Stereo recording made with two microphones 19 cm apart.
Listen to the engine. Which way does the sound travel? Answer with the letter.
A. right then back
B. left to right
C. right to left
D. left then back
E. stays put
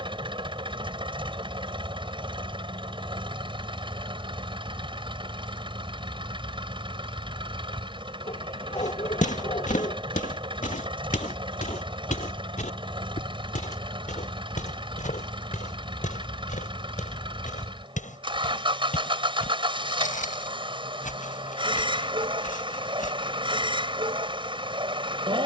E.